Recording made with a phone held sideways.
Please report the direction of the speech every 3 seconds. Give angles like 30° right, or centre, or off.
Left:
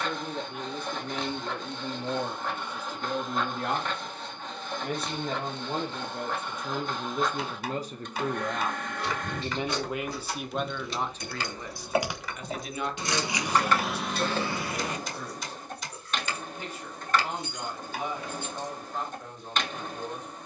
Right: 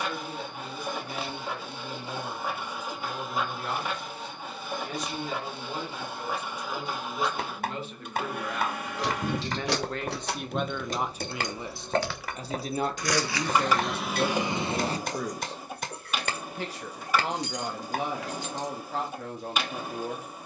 60° left, 50° left, 40° left, centre, 50° right, 70° right, 80° right.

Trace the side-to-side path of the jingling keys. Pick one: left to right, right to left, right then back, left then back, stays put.
left then back.